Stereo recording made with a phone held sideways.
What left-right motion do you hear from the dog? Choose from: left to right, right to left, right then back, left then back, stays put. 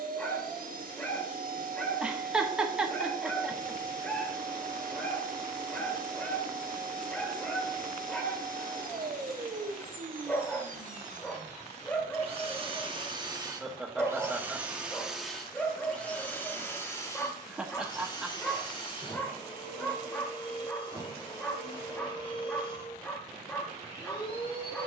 stays put.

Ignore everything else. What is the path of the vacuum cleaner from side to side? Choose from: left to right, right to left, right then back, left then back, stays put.
right to left.